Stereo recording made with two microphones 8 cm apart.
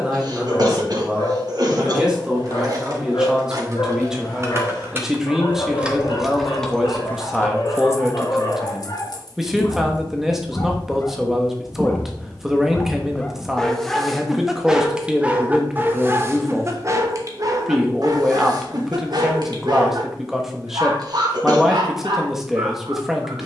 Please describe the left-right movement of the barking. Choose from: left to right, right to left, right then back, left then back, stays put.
left to right.